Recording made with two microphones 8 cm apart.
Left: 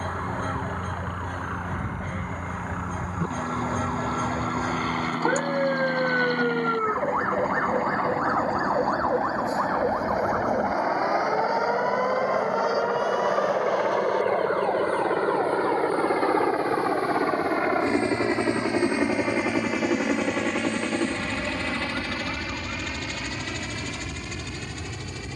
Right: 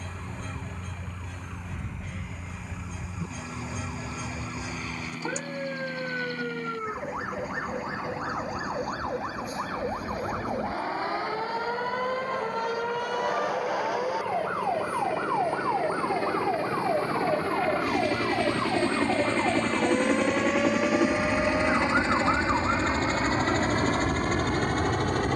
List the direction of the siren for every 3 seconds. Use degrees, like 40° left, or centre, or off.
50° left, 40° left, 30° left, 20° left, centre, 20° right, 40° right, 50° right, 60° right.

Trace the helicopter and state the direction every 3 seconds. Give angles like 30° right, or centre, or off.
70° left, 70° left, 70° left, 60° left, 50° left, 40° left, 10° left, 30° right, 50° right.